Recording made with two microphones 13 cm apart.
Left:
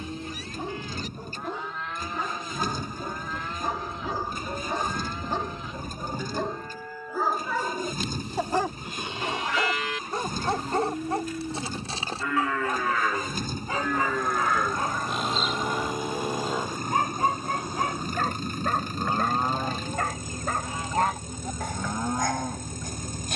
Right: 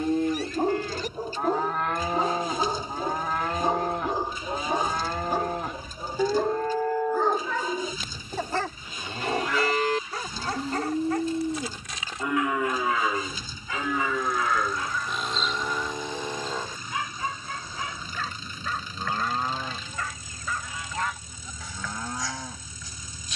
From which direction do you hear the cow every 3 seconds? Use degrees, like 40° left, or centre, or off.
70° right, 70° right, 70° right, 40° right, 10° right, 10° left, 20° left, 30° left.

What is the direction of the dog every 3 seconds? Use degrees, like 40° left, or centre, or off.
40° right, 20° right, 10° left, 30° left, 40° left, 50° left, 50° left, 60° left.